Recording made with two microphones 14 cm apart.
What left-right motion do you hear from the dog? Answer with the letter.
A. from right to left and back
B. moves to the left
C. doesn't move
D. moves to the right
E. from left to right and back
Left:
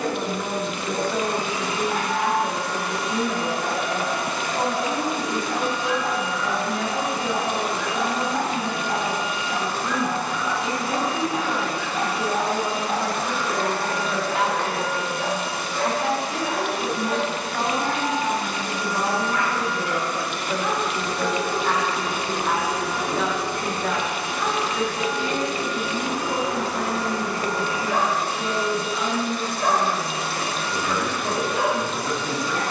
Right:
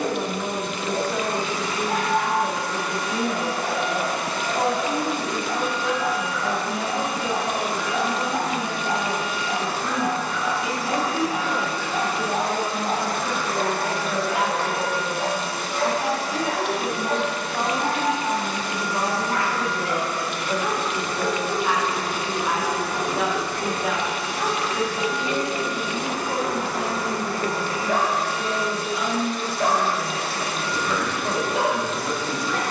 C.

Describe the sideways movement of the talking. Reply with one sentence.
You can hear the talking stay in one place.